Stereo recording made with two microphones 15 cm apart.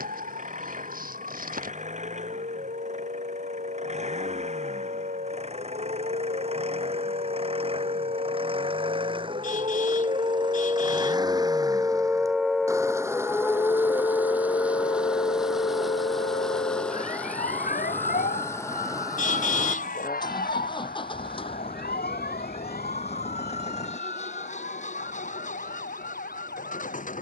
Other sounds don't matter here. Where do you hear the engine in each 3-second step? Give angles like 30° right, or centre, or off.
50° right, 50° right, 40° right, 30° right, 10° right, centre, 20° left, 40° left, 50° left.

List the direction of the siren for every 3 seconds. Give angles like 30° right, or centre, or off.
70° right, 70° right, 60° right, 30° right, 20° left, 50° left, 70° left, 80° left, 80° left.